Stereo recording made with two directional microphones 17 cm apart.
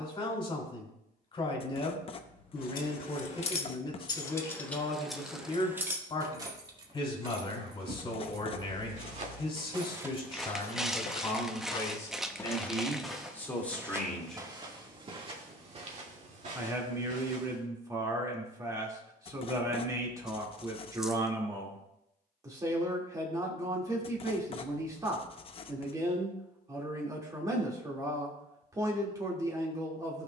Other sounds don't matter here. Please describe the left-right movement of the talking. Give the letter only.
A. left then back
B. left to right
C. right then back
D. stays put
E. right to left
B.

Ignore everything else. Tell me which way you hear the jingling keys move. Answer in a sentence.
You can hear the jingling keys go from the left side to the right.